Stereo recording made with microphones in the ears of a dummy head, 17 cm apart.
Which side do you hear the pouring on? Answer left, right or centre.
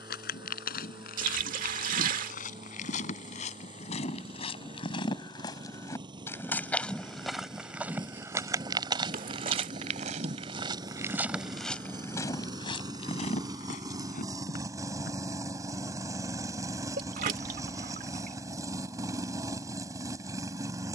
right.